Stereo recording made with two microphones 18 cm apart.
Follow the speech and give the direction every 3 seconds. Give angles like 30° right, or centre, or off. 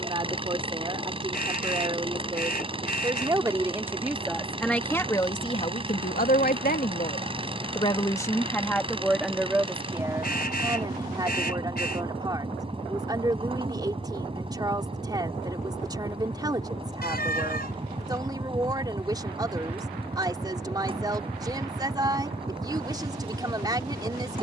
30° right, centre, 30° left, 20° right, 20° right, 20° right, 20° right, 20° right.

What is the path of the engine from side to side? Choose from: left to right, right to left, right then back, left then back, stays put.
stays put.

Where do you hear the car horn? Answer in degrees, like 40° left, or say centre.
60° left.